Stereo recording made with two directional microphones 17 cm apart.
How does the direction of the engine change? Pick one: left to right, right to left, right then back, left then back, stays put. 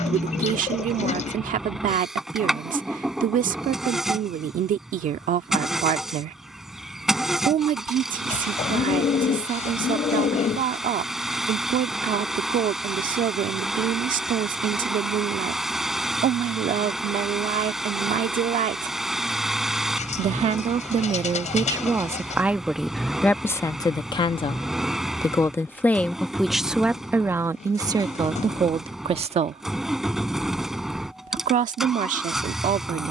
stays put.